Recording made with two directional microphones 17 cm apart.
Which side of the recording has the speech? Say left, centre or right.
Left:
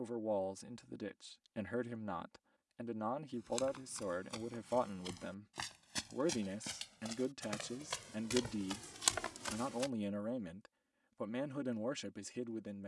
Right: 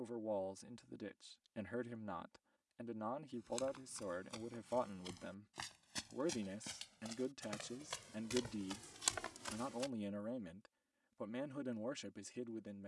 left.